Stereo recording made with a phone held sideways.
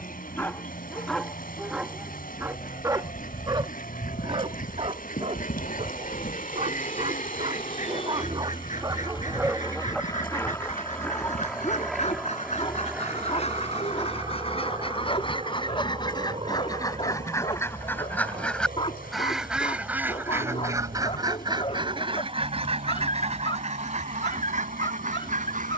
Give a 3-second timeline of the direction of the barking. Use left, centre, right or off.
centre, right, right, centre, left, left, left, left, left.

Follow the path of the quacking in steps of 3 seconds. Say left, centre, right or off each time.
left, left, left, left, left, left, centre, right, right.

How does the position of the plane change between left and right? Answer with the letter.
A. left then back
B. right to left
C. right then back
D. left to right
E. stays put
D.